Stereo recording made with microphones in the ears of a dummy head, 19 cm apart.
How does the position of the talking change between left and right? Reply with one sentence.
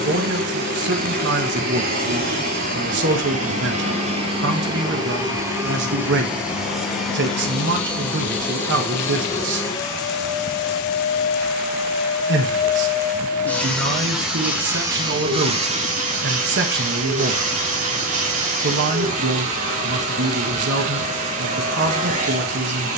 You can hear the talking stay in one place.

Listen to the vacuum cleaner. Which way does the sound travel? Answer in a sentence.
In this clip you hear the vacuum cleaner move from right to left and back again.